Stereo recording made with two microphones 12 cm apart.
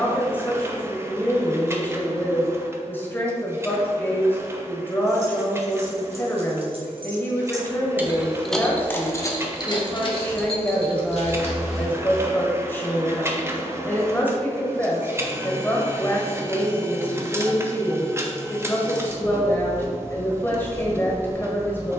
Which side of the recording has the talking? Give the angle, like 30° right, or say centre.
20° left.